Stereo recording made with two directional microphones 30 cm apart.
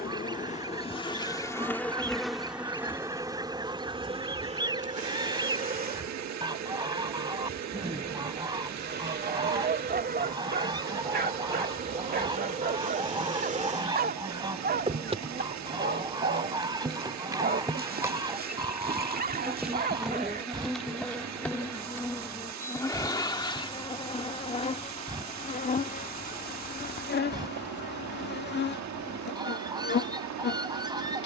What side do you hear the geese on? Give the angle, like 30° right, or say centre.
10° right.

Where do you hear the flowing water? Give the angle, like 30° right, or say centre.
60° right.